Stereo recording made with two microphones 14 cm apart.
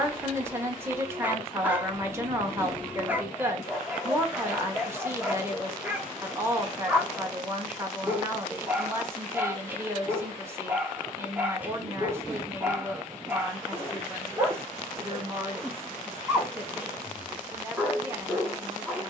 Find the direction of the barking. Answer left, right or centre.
centre.